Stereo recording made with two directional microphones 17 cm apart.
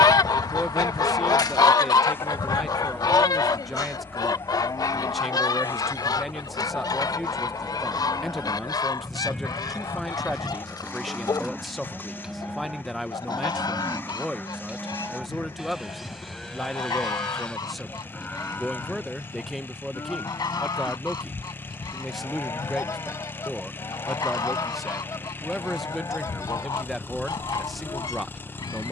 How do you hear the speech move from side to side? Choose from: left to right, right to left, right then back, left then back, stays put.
stays put.